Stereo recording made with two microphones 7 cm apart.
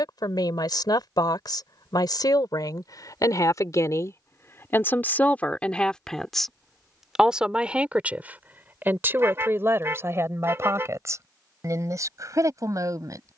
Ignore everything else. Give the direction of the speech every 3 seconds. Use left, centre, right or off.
left, left, centre, right, right.